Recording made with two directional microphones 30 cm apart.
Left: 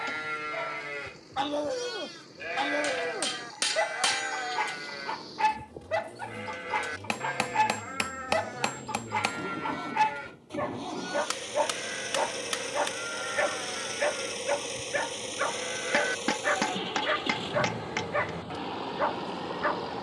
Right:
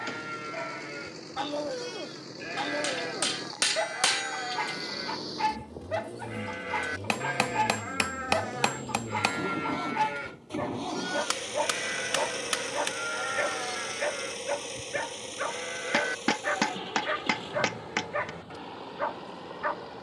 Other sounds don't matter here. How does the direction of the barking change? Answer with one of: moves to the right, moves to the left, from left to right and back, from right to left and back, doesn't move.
doesn't move.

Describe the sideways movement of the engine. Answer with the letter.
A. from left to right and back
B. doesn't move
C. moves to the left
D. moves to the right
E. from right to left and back
C.